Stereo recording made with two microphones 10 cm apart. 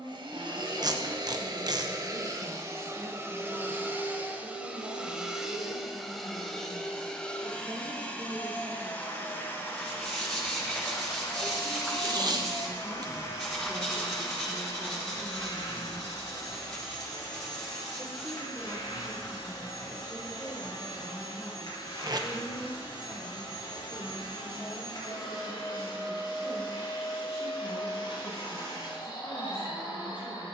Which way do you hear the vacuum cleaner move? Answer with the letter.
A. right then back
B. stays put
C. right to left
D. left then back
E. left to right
C.